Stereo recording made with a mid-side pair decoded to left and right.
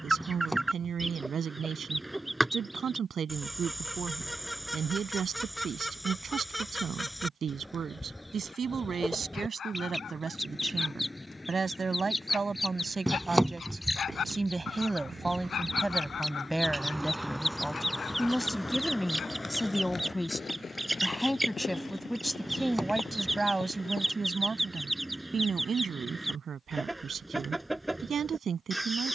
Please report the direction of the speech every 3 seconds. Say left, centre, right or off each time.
right, right, right, right, right, centre, centre, centre, right, right.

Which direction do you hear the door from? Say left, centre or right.
centre.